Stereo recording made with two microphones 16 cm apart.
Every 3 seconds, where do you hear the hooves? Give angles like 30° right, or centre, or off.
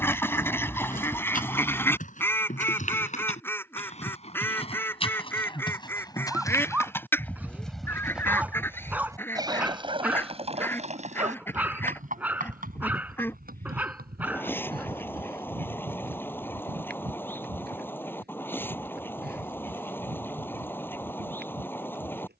50° left, 40° left, 10° left, 40° right, 60° right, 70° right, 80° right, 80° right.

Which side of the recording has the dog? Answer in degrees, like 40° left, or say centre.
10° right.